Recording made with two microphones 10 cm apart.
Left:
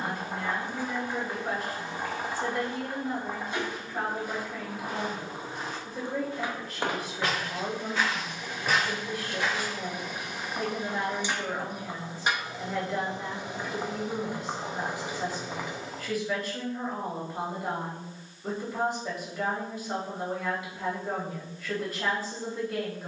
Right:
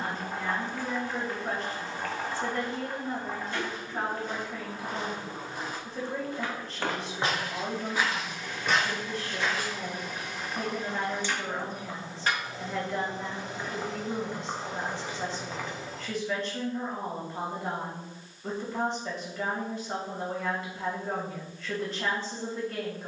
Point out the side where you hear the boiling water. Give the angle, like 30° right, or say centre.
20° left.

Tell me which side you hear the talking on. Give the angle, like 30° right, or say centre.
10° left.